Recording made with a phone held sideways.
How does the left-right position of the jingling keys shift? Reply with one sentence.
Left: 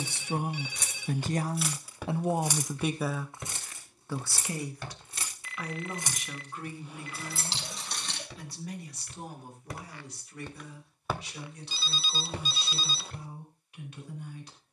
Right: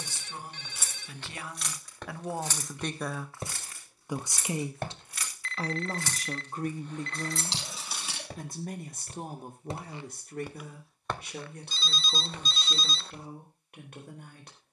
You can hear the jingling keys move from right to left and back again.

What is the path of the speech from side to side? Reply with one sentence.
In this clip you hear the speech move from left to right.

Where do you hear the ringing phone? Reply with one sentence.
In this clip you hear the ringing phone in the centre.